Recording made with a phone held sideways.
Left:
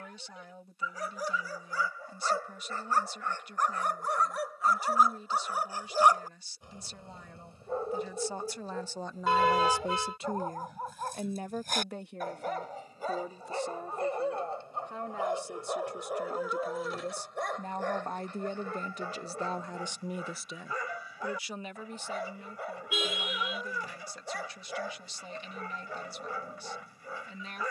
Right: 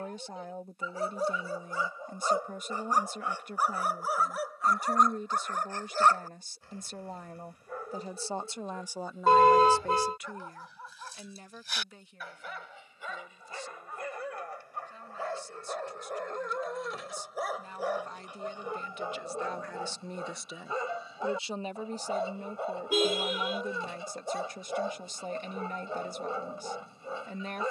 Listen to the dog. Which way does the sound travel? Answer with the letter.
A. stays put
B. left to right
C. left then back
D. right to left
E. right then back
C.